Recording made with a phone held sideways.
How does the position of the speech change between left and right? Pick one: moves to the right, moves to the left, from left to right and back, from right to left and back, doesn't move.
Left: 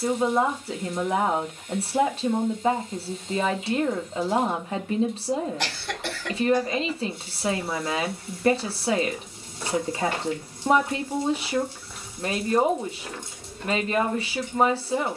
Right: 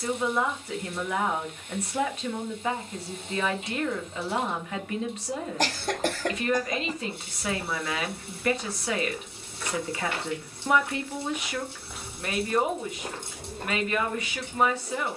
doesn't move.